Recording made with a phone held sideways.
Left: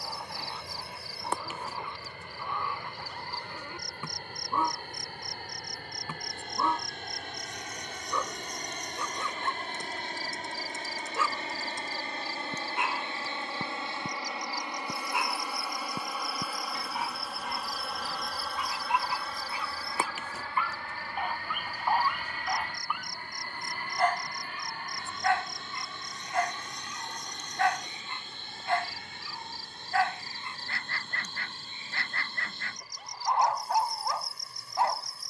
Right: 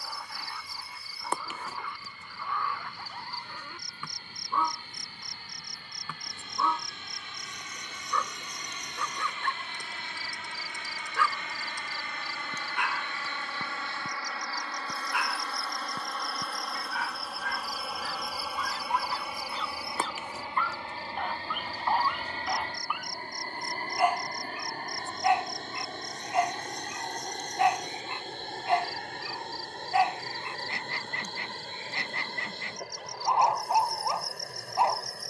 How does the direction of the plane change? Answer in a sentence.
In this clip you hear the plane move from left to right.